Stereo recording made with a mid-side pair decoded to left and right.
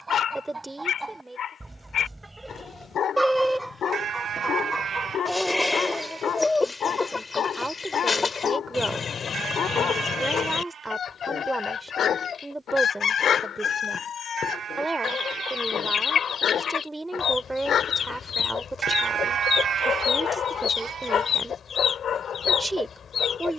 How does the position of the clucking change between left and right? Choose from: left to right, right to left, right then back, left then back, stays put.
right to left.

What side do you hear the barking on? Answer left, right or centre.
left.